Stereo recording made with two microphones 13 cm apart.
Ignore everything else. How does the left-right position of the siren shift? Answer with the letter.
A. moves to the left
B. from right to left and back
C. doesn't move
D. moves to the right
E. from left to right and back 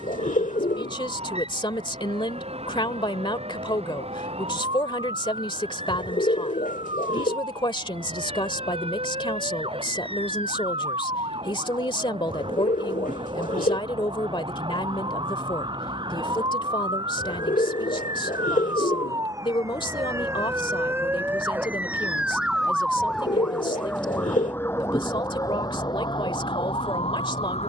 A.